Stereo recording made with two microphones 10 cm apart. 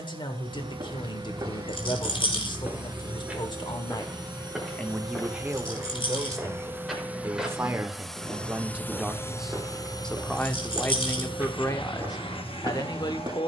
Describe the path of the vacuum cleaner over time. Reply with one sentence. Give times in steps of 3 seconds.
You can hear the vacuum cleaner on the right from 0 s, in the centre from 6 s and on the left from 9 s.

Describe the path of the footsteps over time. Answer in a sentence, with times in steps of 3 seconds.
You can hear the footsteps on the right from 0 s, in the centre from 3 s and on the right from 9 s.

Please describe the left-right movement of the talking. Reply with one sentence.
In this clip you hear the talking move from left to right and back again.